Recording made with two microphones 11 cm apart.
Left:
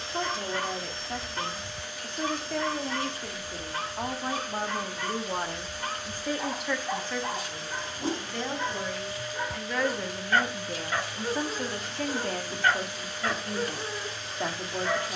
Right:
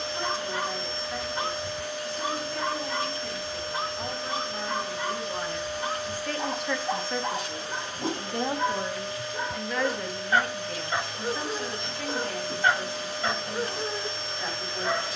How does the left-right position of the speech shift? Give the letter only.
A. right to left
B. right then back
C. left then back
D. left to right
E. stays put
B.